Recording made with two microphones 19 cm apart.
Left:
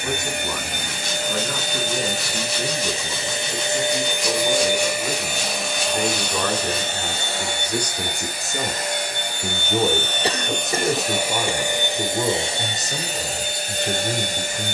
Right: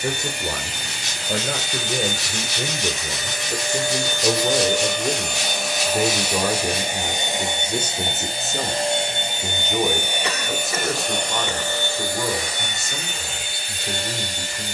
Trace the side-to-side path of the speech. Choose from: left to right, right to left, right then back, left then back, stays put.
right to left.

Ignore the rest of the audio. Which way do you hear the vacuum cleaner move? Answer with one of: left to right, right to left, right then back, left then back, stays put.
right then back.